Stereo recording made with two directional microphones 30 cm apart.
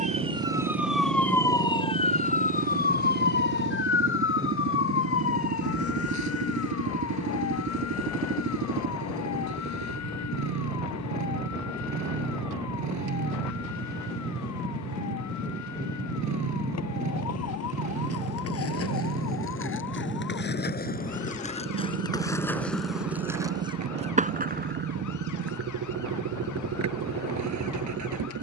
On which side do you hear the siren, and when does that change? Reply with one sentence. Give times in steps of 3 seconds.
You can hear the siren in the centre from 0 s and on the left from 3 s.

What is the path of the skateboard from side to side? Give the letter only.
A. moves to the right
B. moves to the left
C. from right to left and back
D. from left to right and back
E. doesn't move
A.